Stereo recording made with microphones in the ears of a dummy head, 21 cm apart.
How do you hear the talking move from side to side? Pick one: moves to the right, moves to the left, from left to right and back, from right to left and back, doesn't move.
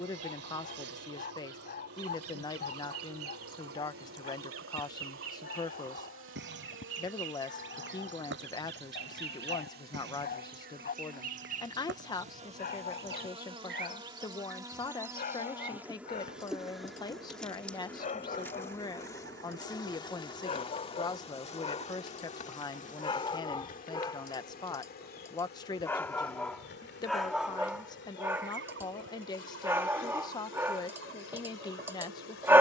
doesn't move.